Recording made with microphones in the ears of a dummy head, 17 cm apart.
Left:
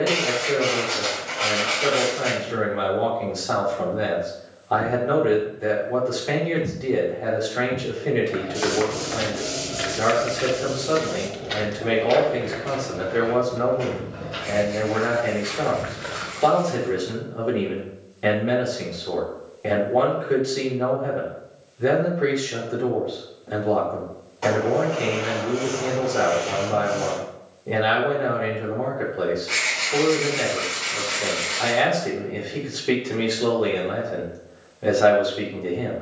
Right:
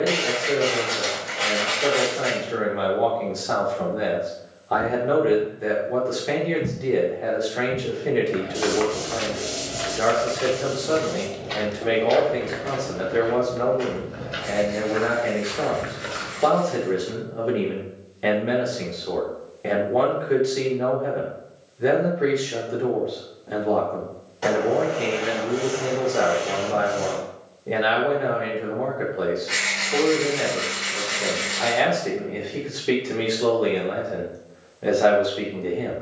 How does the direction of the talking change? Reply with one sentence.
In this clip you hear the talking stay in one place.